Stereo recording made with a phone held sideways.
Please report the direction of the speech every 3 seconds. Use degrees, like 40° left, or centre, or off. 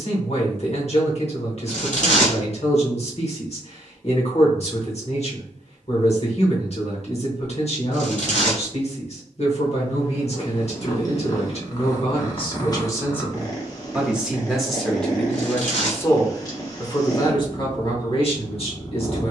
50° left, 50° left, 50° left, 50° left, 20° left, 20° left, 50° left.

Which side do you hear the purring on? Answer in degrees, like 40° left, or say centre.
30° left.